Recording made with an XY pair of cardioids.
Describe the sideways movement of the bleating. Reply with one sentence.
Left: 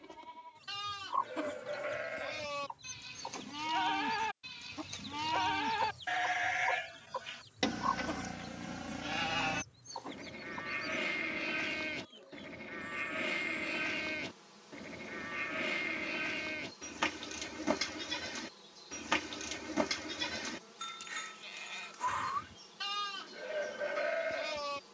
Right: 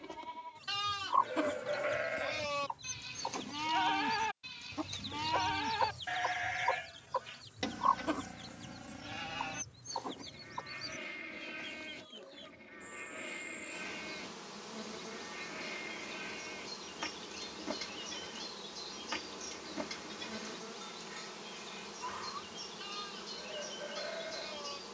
In this clip you hear the bleating travel towards the left.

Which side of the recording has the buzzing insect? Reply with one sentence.
You can hear the buzzing insect on the right.